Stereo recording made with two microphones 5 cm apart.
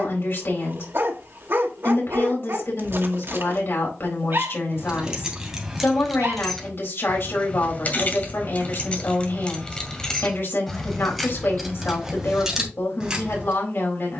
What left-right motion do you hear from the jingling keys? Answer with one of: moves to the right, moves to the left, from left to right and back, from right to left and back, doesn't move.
from right to left and back.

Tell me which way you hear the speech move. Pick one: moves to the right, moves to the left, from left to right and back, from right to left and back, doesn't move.
doesn't move.